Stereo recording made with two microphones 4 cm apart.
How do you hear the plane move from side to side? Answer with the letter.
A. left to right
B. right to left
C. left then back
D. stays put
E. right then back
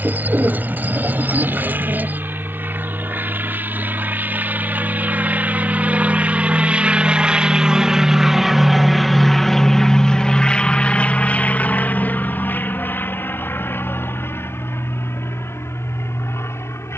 B.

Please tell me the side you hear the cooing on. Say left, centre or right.
right.